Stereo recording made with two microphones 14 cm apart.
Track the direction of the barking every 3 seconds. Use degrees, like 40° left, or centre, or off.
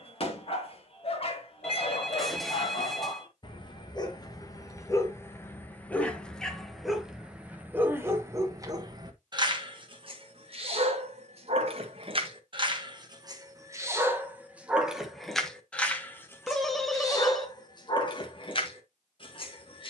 40° left, 20° left, 10° right, 40° right, 20° right, 20° left, 40° left.